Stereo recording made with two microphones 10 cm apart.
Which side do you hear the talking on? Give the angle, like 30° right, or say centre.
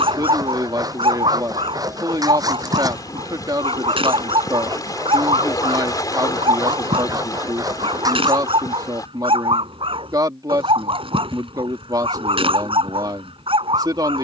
40° right.